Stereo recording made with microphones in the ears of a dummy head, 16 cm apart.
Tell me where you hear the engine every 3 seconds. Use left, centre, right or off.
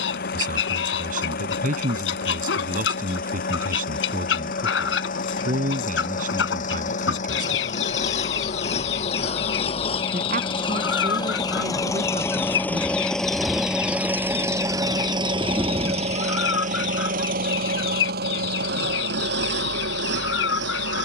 left, left, left, left, centre, right, right.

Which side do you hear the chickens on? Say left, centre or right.
left.